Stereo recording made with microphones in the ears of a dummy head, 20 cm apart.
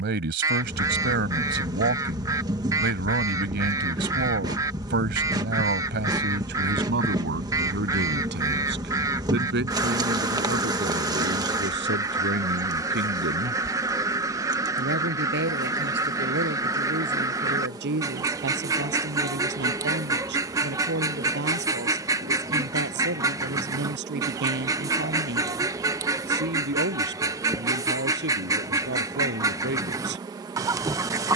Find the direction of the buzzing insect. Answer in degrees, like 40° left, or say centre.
20° right.